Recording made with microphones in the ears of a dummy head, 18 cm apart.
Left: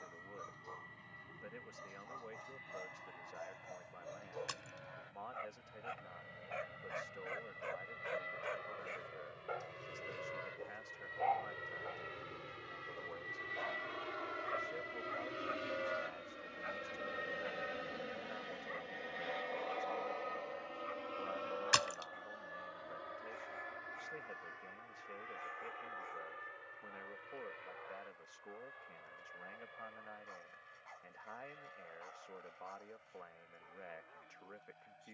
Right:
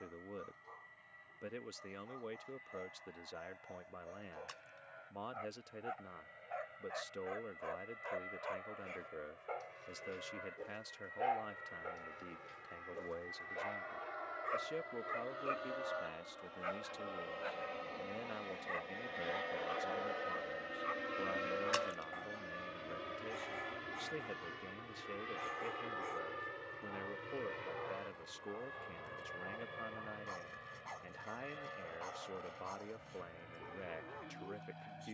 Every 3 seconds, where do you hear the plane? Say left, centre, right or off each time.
left, left, left, left, left, left, centre, right, right, right, right, right.